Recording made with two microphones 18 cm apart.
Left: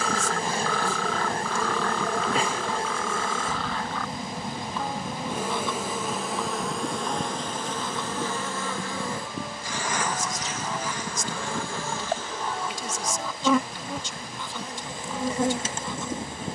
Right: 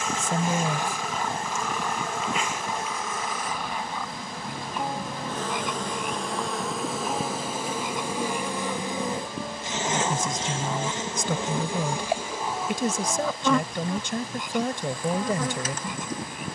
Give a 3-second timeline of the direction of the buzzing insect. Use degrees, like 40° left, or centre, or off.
30° left, 20° left, 10° right, 20° right, centre, 30° left.